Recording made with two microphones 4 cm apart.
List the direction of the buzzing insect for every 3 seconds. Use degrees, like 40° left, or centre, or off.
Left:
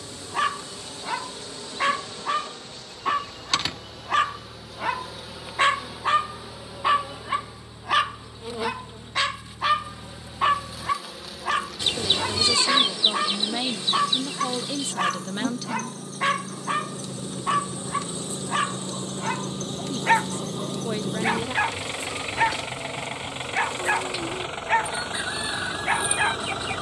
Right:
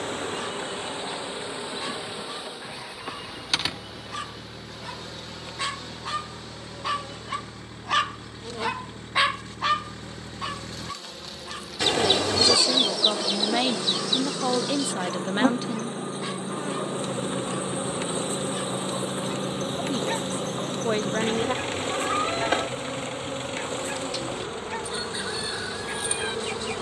30° right, centre, 10° left, 10° left, 30° right, 50° right, 50° right, 50° right, 50° right.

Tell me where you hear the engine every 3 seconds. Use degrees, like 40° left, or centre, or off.
60° right, 60° right, 50° right, 50° right, 40° right, 30° right, 10° right, 20° left, 50° left.